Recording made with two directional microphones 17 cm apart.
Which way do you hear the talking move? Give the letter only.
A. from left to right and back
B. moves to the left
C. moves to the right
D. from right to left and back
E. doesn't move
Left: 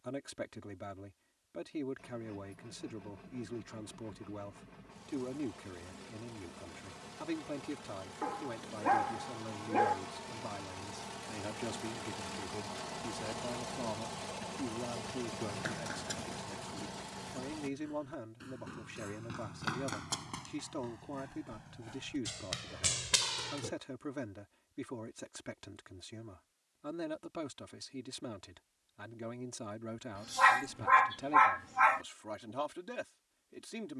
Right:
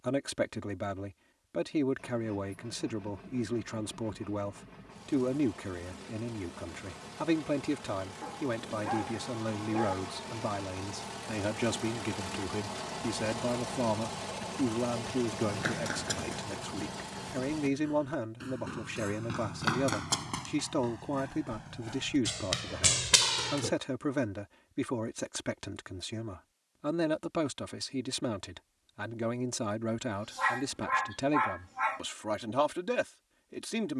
E.